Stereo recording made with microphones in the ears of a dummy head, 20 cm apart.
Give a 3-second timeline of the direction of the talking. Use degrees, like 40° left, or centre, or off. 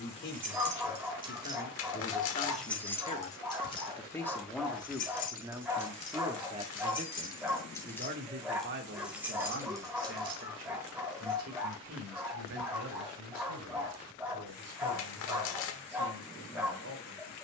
40° left, centre, 40° right, 60° right, 70° right, 80° right.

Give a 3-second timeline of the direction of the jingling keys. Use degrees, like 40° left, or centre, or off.
20° right, 30° left, 20° left, 20° right, off, off.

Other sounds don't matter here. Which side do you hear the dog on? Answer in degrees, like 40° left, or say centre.
10° right.